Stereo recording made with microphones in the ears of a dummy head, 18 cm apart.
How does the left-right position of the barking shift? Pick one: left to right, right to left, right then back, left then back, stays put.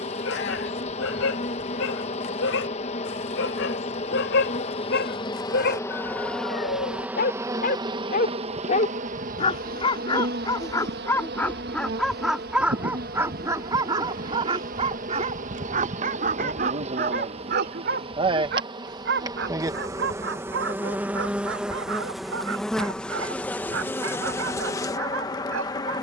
left to right.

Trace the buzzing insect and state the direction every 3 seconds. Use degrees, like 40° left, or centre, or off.
30° left, 30° left, 10° right, 50° right, 40° right, 30° right, 20° right, centre, 20° left.